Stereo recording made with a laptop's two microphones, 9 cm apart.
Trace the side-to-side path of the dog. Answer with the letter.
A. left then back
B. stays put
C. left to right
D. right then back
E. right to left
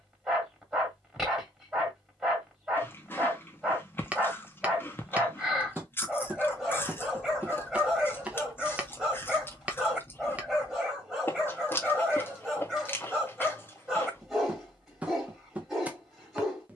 B.